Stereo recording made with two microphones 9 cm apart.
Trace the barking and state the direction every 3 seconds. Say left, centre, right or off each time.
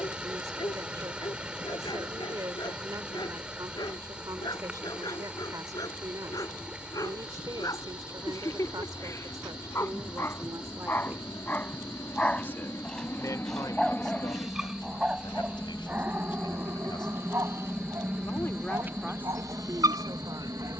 left, left, left, left, centre, right, right.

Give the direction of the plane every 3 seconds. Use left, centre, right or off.
left, left, left, left, left, centre, right.